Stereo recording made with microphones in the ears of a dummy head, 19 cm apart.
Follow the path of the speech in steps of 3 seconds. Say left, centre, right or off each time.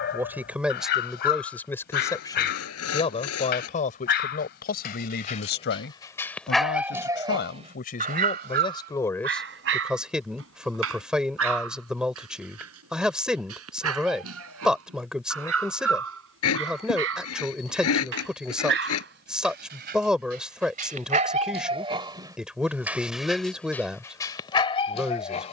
centre, left, left, centre, centre, centre, centre, centre, centre.